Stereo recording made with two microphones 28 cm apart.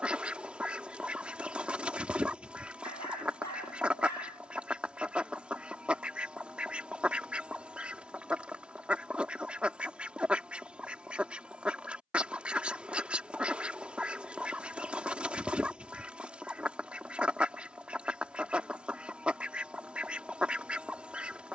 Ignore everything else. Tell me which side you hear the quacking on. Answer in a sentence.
You can hear the quacking in the centre.